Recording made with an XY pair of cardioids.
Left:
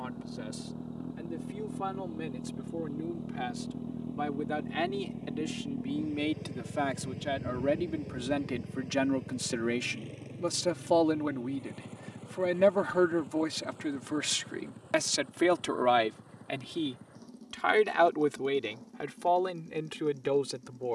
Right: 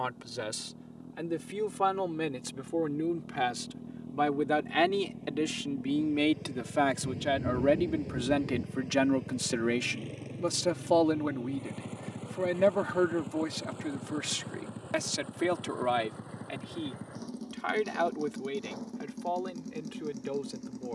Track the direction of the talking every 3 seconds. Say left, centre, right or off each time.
right, right, right, centre, centre, left, left.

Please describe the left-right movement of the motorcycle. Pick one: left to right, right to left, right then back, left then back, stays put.
left to right.